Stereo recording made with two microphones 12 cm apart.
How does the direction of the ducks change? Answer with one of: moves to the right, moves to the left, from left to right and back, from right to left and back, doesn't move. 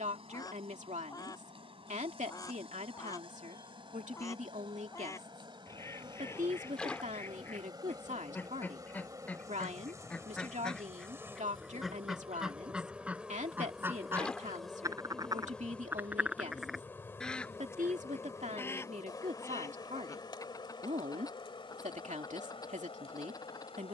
from left to right and back.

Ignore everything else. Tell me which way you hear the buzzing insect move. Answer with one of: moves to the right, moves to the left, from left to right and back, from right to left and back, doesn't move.
moves to the left.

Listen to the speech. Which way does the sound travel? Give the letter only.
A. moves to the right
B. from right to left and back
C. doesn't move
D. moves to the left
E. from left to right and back
C.